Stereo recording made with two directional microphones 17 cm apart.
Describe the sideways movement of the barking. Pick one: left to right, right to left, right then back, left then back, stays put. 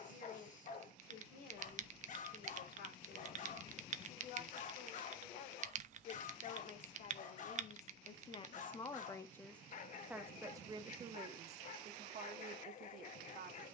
stays put.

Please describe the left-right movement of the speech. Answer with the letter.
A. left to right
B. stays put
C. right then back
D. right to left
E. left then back
A.